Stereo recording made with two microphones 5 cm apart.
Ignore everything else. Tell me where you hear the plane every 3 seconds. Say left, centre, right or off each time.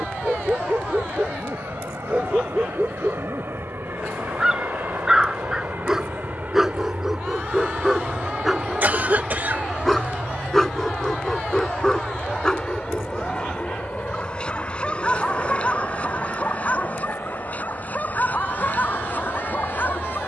right, right, right, centre, left, left, left.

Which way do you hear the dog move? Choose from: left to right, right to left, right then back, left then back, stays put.
right to left.